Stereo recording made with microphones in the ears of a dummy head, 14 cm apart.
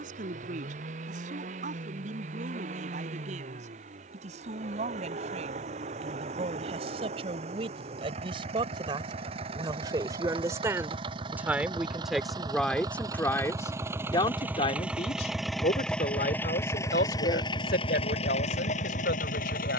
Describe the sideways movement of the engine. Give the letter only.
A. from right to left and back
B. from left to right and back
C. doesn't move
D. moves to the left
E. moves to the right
D.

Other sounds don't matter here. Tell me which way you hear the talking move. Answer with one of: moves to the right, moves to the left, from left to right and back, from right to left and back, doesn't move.
moves to the left.